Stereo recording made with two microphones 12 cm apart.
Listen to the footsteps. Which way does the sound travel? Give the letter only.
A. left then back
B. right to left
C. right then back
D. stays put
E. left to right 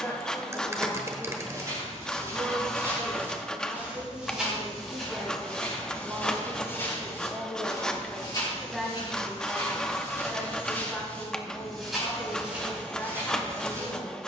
A.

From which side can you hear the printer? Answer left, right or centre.
centre.